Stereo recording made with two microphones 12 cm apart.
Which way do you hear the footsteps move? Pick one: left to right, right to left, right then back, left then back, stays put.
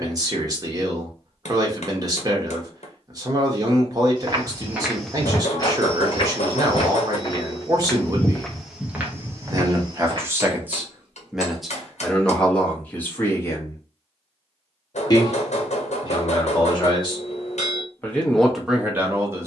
left then back.